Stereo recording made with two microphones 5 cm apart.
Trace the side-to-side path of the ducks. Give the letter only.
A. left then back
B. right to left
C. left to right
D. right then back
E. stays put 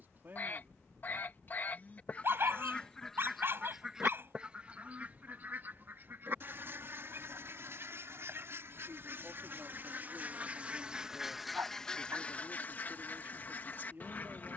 D.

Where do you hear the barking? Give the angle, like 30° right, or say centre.
50° right.